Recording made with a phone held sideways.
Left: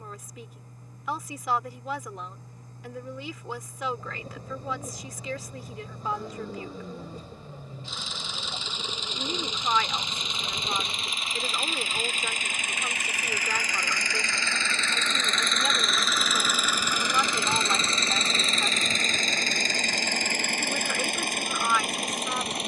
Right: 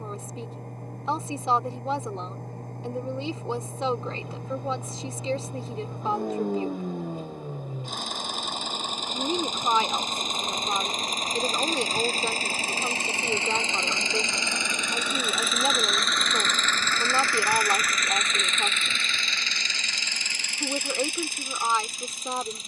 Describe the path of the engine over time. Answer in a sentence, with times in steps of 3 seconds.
You can hear the engine on the right from 0 s, in the centre from 15 s and on the left from 18 s.